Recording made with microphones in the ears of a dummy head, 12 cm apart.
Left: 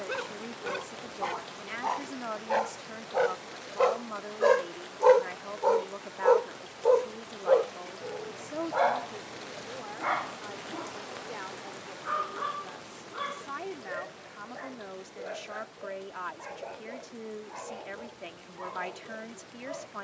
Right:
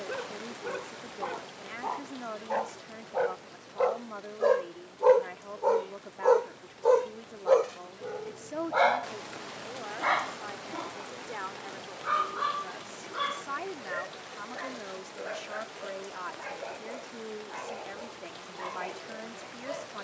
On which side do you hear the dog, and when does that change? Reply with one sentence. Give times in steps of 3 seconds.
In this clip you hear the dog on the left from 0 s and on the right from 6 s.